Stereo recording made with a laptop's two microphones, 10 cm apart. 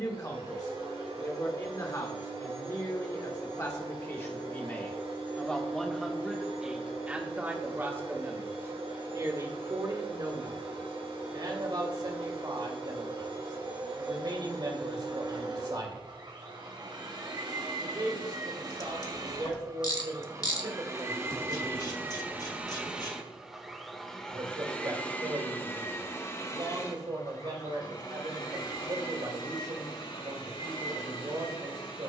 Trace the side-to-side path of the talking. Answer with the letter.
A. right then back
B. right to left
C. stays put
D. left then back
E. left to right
E.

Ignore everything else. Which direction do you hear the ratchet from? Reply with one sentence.
In this clip you hear the ratchet on the left.